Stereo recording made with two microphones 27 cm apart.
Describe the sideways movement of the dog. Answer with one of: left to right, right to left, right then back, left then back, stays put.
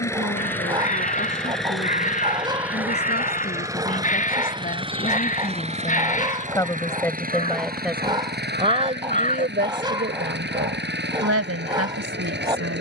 stays put.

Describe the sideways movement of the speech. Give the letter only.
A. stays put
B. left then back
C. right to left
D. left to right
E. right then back
D.